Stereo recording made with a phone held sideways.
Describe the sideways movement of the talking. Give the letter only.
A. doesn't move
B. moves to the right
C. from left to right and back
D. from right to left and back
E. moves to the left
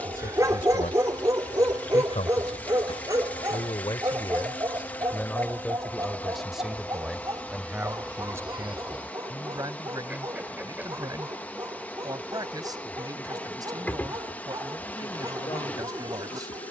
B.